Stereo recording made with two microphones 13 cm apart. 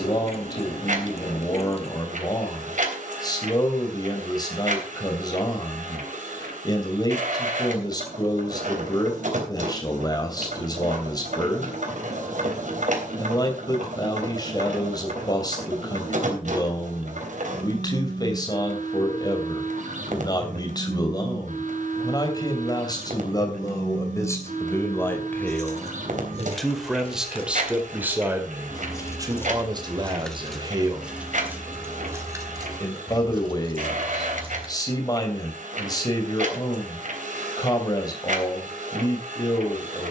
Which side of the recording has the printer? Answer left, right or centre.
right.